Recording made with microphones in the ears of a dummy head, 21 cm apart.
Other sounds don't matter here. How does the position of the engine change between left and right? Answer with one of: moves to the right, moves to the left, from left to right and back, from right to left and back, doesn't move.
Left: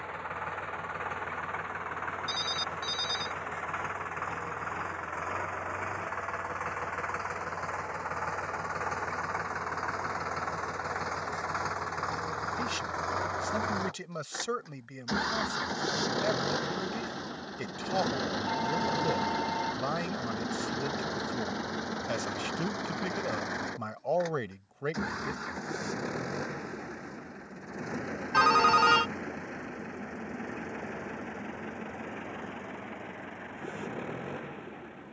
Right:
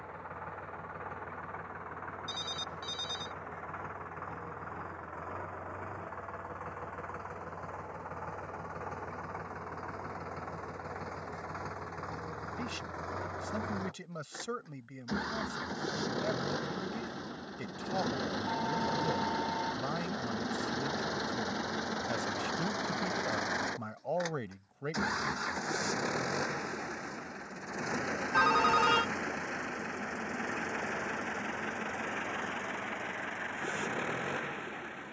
moves to the right.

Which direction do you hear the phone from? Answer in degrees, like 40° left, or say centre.
10° left.